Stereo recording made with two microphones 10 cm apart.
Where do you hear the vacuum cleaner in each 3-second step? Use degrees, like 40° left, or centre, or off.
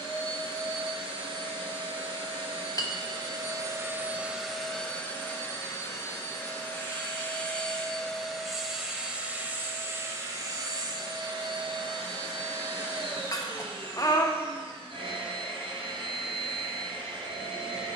60° right, 10° right, 10° left, 40° right, 60° right, 60° right.